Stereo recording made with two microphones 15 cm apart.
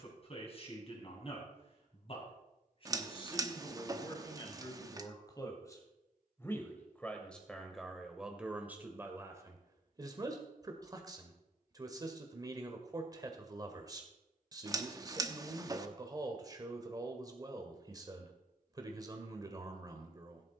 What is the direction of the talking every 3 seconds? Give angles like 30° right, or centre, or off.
40° left, 30° left, centre, 20° right, 20° right, 20° right, 20° right.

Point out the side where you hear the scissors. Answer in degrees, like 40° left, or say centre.
20° right.